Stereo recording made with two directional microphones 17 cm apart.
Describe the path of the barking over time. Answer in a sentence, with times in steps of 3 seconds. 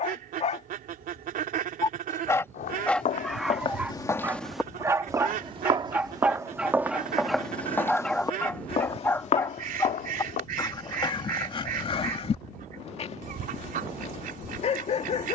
You can hear the barking on the left from 0 s, in the centre from 3 s and on the left from 9 s.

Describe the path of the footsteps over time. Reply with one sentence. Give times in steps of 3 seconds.
You can hear the footsteps on the left from 0 s, in the centre from 3 s, on the left from 9 s and not at all from 12 s.